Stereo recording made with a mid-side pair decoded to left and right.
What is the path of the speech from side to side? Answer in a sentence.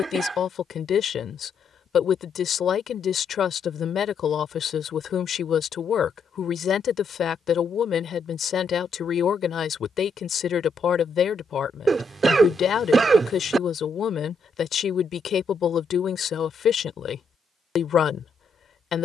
In this clip you hear the speech stay in one place.